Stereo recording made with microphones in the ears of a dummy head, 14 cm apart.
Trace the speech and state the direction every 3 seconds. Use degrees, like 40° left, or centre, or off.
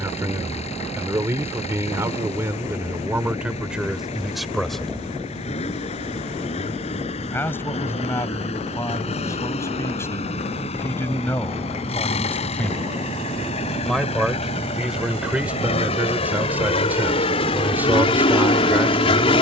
10° right, centre, 20° left, 20° left, centre, 10° right, 10° right.